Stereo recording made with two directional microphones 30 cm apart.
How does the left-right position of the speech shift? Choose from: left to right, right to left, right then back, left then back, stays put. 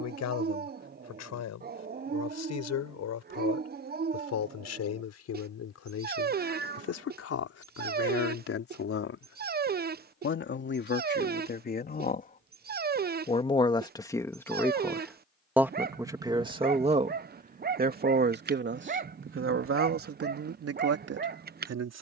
left to right.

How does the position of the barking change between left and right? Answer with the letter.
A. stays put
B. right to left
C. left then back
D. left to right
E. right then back
A.